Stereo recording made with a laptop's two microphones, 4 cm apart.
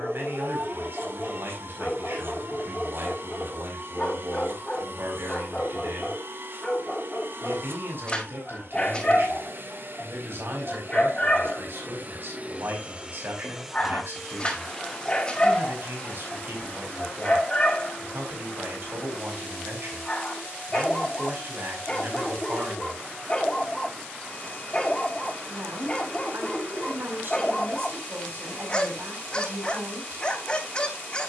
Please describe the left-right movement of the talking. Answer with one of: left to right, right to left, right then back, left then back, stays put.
stays put.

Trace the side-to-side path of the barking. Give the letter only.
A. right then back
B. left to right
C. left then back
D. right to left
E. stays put
E.